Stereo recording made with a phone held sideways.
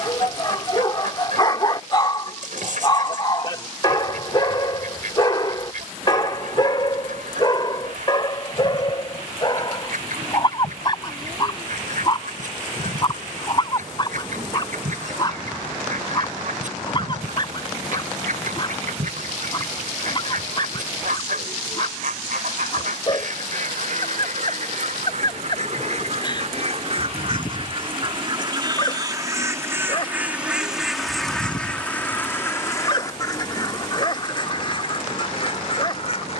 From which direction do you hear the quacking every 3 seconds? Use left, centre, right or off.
right, right, right, right, right, right, right, right, right, right, centre, left.